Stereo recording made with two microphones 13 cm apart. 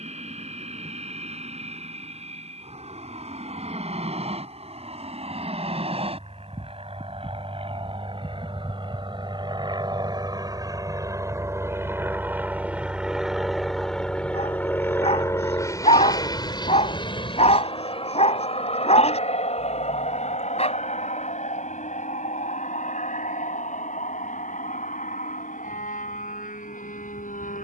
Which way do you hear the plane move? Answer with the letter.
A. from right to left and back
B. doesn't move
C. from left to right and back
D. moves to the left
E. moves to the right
D.